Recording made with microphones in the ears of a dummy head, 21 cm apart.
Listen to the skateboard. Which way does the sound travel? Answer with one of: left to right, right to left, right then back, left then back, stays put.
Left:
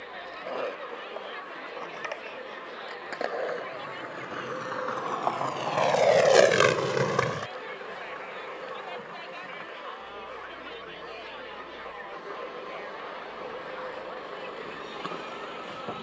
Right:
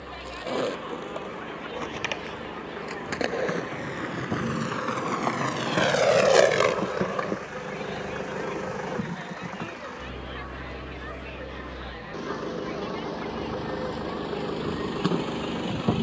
right to left.